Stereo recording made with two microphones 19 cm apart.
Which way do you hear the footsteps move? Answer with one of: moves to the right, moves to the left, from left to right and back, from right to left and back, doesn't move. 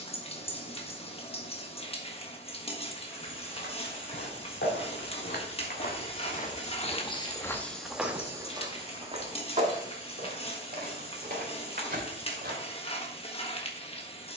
moves to the right.